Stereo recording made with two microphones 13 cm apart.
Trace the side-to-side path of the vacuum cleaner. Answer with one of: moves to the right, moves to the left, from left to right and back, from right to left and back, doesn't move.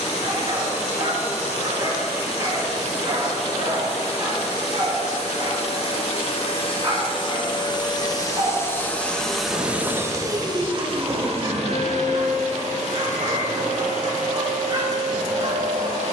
moves to the right.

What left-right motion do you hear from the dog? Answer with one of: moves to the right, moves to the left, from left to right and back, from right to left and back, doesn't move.
doesn't move.